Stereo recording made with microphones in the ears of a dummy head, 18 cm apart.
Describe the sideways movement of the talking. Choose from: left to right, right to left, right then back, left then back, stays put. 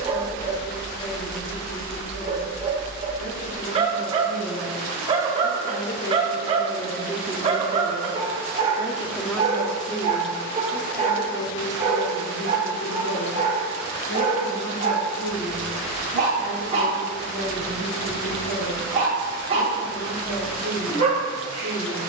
right then back.